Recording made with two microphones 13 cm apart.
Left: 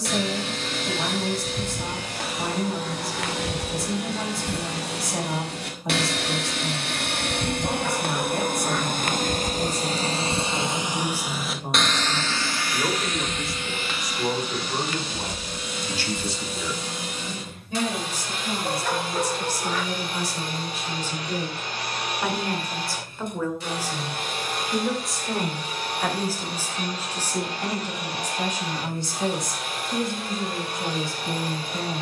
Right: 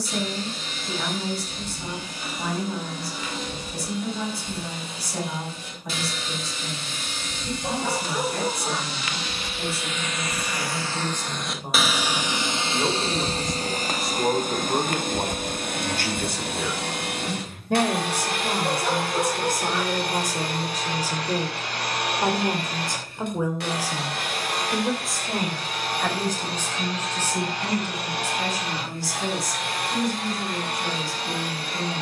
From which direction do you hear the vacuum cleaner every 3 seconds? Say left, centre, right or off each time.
left, left, left, left, right, right, right, right, right, right, right.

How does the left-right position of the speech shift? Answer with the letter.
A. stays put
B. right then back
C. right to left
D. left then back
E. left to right
B.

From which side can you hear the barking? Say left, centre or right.
centre.